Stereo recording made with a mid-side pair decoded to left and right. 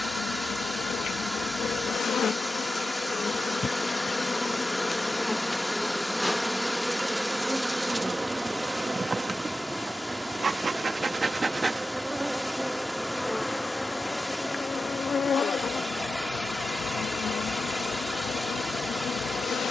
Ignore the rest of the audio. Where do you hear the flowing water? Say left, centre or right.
centre.